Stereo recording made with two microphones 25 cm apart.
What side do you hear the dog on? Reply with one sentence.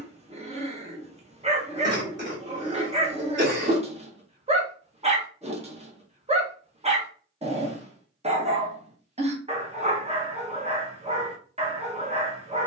You can hear the dog on the right.